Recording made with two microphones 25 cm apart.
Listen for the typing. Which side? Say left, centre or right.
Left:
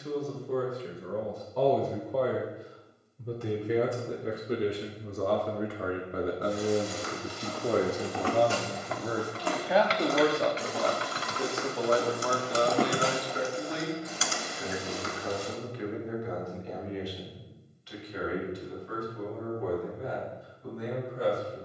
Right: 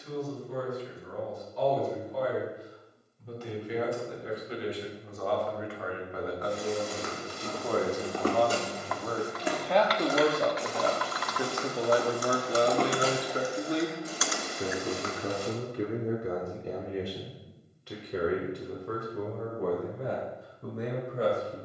left.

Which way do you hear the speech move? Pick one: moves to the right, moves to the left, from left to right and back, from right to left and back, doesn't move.
moves to the right.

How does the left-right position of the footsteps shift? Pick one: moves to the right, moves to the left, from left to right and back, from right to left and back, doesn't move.
from right to left and back.